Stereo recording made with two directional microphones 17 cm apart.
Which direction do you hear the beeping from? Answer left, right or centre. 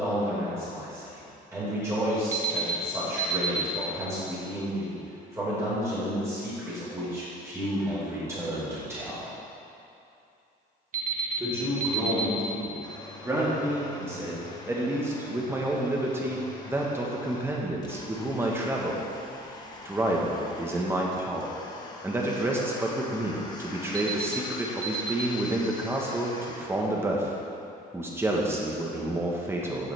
right.